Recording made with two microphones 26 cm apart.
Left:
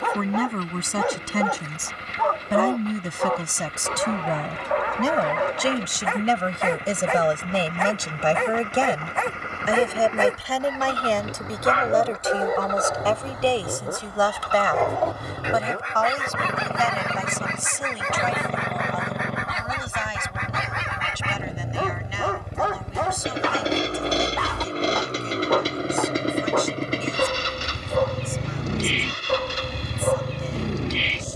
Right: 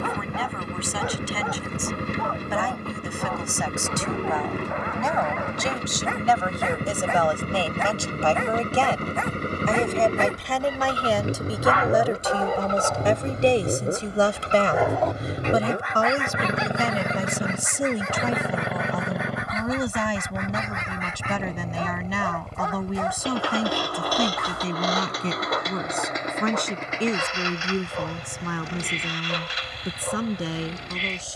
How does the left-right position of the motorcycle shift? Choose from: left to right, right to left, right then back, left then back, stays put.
right to left.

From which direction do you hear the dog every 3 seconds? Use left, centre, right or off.
left, left, left, left, centre, left, left, left, left, left, left.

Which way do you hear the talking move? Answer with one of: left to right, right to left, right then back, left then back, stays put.
left to right.